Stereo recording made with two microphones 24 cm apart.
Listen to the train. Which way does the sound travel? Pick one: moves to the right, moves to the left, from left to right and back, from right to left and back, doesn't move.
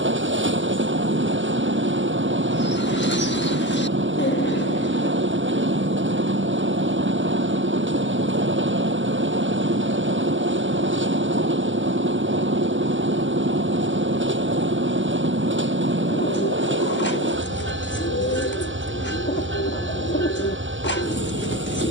doesn't move.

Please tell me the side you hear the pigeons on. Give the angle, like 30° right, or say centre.
50° left.